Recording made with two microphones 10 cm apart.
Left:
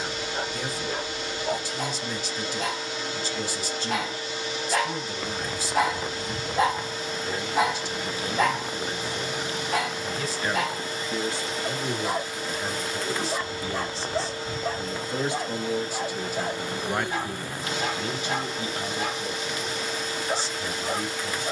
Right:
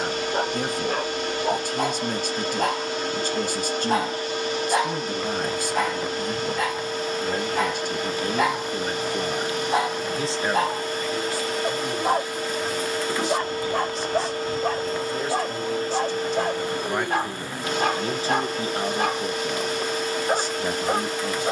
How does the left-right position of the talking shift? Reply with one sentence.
You can hear the talking go left and come back.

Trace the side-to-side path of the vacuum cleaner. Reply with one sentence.
In this clip you hear the vacuum cleaner stay put.